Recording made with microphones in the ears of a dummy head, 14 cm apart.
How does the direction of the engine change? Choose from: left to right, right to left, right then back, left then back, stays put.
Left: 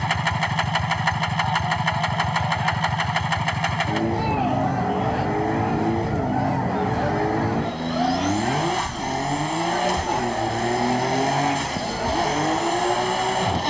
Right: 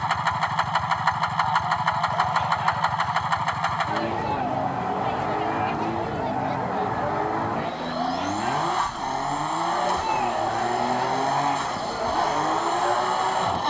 stays put.